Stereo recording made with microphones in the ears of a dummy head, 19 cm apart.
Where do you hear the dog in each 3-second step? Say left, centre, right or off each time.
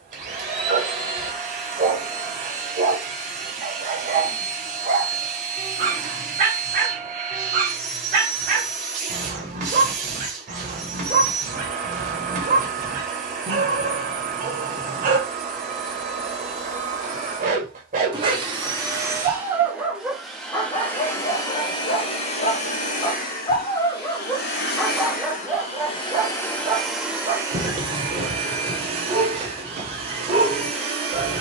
right, right, right, right, right, right, centre, left, centre, right, right.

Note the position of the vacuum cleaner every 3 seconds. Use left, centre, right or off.
right, right, right, right, right, right, centre, left, left, right, right.